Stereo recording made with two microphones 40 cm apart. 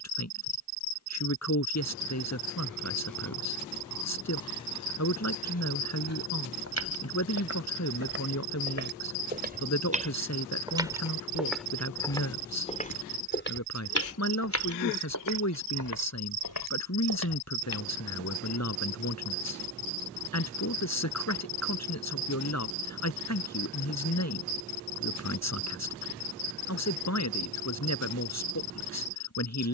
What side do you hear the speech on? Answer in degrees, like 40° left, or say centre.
40° left.